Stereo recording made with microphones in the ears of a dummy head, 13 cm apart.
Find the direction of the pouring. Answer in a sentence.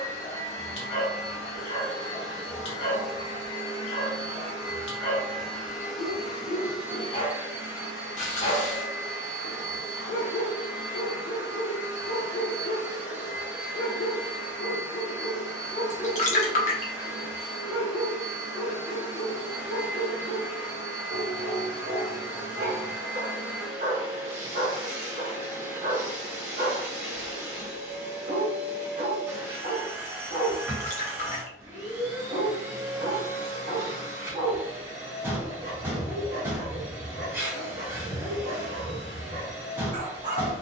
You can hear the pouring on the left.